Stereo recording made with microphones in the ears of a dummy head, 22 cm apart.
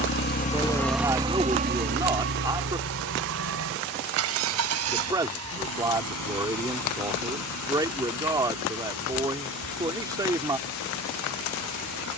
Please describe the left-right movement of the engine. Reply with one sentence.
You can hear the engine move from left to right.